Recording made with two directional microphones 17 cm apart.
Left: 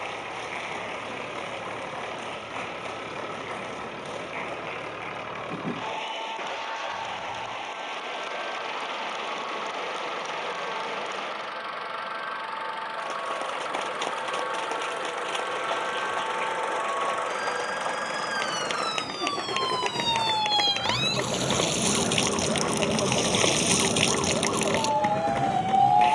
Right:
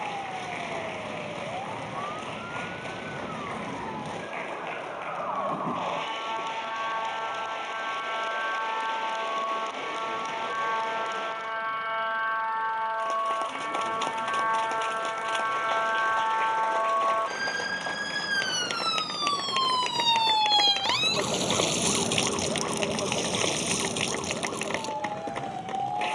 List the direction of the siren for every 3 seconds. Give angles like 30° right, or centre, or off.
50° right, 50° right, 50° right, 50° right, 40° right, 40° right, 20° right, 20° left, 50° left.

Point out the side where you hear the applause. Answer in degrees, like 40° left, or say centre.
10° left.